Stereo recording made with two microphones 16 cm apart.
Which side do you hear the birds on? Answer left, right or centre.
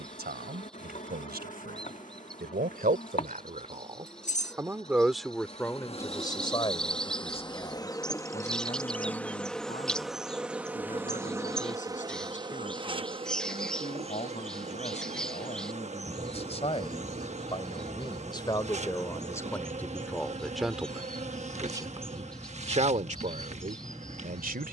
centre.